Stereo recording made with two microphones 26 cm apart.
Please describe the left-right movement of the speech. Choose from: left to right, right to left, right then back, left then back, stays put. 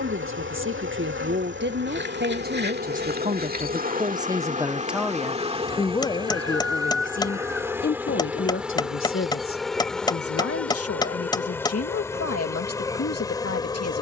right to left.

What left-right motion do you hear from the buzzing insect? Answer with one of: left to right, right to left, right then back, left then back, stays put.
right to left.